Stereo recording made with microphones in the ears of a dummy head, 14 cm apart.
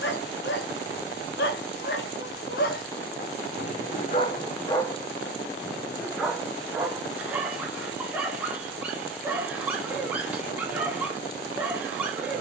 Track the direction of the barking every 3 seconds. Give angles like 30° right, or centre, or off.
80° left, 30° left, 10° right, 10° right.